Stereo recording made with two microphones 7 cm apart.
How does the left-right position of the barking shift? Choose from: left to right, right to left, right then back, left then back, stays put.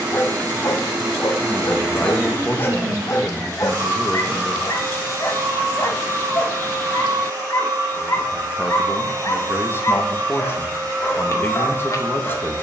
stays put.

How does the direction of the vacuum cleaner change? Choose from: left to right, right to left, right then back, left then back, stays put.
stays put.